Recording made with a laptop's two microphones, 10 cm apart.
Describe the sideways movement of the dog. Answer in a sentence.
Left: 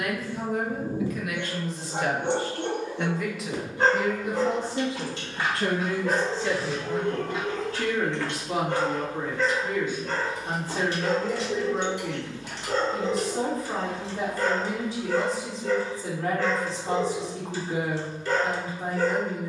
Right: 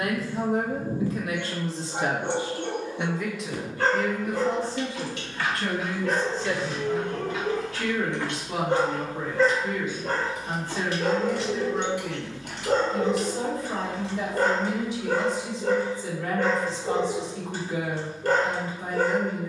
You can hear the dog move from left to right.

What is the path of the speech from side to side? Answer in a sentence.
In this clip you hear the speech go from the right side to the left.